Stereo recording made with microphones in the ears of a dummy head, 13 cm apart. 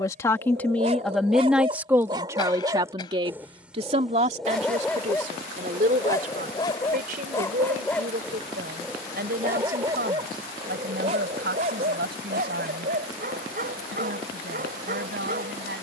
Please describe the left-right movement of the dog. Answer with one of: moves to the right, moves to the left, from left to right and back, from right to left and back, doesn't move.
from right to left and back.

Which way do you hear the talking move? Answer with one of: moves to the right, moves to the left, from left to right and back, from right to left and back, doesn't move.
moves to the right.